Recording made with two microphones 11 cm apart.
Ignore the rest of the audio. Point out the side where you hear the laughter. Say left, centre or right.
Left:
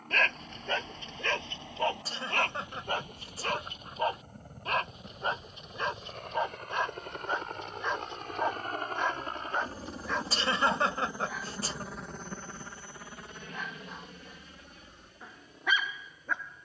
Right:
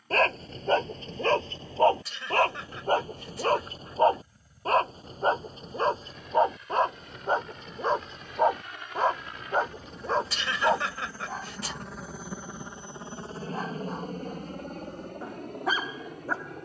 left.